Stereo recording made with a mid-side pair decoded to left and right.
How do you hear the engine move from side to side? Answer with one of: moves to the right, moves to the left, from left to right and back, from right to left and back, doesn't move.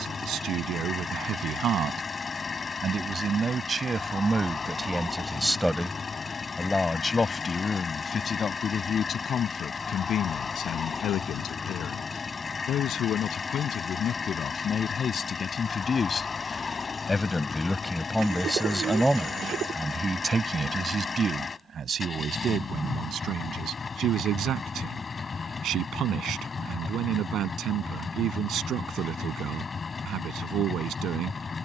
doesn't move.